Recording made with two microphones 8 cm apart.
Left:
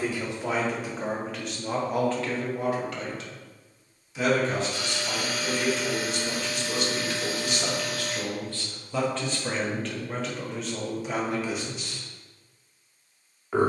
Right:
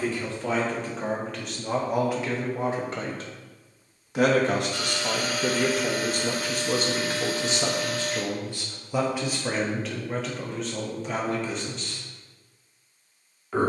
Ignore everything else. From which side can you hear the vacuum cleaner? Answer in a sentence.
In this clip you hear the vacuum cleaner on the right.